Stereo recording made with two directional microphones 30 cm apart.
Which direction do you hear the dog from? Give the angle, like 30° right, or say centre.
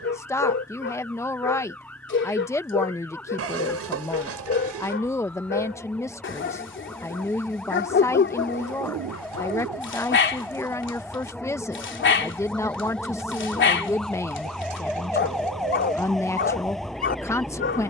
40° left.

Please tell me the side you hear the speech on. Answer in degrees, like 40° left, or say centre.
10° left.